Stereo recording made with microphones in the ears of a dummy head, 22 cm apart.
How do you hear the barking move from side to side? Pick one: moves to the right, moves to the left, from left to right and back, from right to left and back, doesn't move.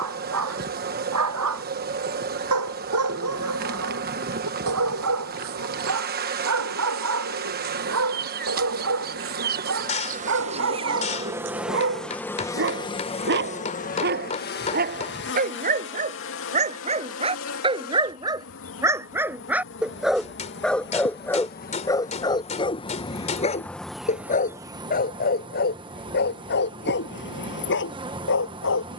moves to the left.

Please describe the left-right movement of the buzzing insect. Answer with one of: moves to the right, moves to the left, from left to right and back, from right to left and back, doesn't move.
from right to left and back.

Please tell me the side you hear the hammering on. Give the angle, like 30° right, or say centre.
30° left.